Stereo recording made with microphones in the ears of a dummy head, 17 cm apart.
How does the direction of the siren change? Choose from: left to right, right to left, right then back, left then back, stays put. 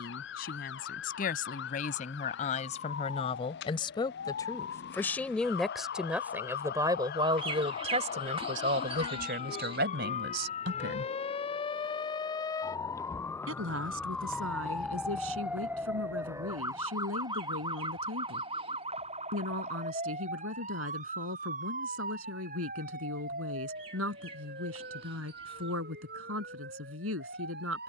left to right.